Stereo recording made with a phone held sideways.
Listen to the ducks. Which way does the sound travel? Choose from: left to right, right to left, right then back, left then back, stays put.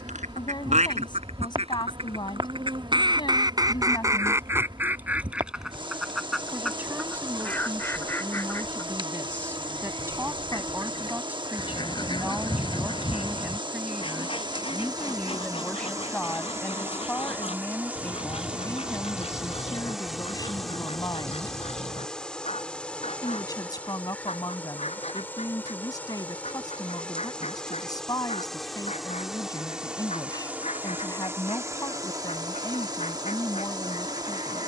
right to left.